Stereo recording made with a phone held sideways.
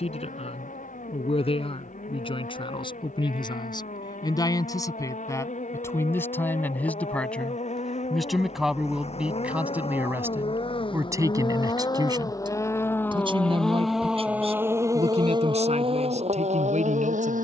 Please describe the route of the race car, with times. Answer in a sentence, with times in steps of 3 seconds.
You can hear the race car on the left from 0 s, in the centre from 12 s and on the right from 15 s.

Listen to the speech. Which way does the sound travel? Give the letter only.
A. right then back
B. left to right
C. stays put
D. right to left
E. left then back
B.